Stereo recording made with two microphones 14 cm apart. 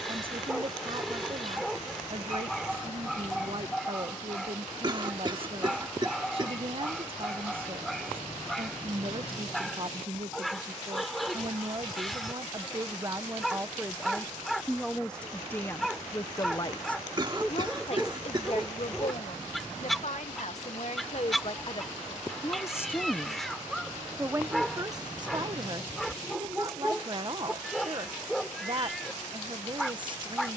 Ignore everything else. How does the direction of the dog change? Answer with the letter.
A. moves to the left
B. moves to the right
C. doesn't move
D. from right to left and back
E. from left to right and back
C.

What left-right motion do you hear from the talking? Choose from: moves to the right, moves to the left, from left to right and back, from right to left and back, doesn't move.
from right to left and back.